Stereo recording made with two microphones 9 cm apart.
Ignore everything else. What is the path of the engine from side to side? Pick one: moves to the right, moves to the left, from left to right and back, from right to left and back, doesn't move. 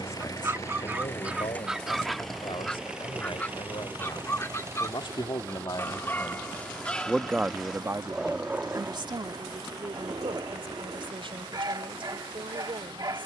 moves to the right.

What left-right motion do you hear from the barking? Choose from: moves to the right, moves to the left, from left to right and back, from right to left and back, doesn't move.
from right to left and back.